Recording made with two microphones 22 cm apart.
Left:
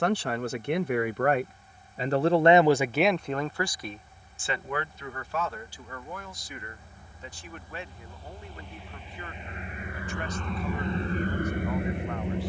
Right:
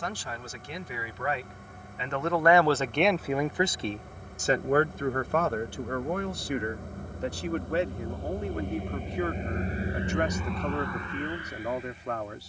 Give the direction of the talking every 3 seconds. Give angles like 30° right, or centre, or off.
50° left, 40° right, 70° right, 70° right.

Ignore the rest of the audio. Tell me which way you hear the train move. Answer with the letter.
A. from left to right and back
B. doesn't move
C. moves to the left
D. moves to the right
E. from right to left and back
C.